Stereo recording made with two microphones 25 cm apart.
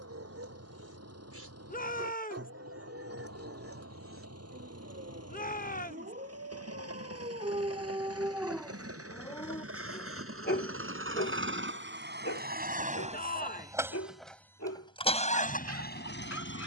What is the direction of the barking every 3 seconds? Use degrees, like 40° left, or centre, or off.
70° right, 60° right, 30° right, 40° left, 70° left, 80° left.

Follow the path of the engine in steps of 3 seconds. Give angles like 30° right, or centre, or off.
80° right, 80° right, 70° right, 60° right, 20° right, 40° left.